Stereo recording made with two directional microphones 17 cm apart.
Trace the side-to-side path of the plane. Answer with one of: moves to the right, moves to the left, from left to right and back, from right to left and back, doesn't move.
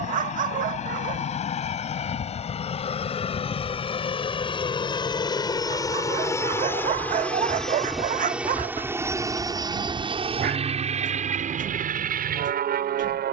moves to the right.